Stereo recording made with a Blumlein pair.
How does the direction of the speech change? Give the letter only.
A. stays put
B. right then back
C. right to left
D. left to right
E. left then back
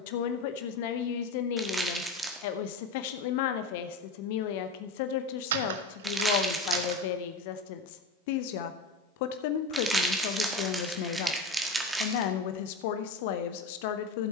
A.